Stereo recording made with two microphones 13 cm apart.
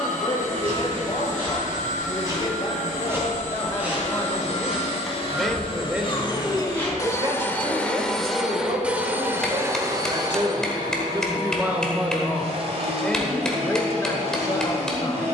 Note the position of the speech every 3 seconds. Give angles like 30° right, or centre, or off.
40° left, 10° left, 40° right, 30° right, 10° left.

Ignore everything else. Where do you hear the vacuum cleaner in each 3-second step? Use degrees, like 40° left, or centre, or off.
70° left, 50° left, 10° left, 30° right, 50° right.